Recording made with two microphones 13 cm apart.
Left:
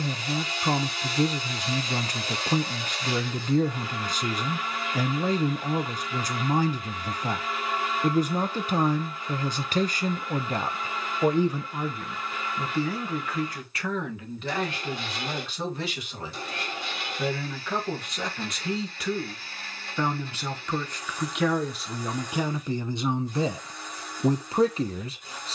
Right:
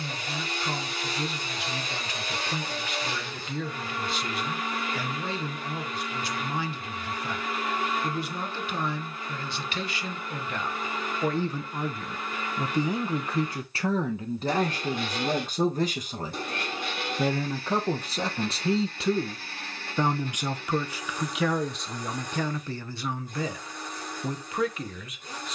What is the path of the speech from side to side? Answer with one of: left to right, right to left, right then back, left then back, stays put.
right then back.